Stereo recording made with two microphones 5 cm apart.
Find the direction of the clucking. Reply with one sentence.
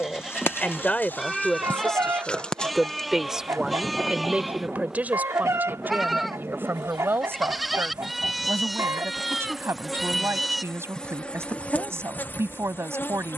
In this clip you hear the clucking on the right.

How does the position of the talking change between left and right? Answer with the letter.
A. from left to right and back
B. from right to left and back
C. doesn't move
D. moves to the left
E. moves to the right
E.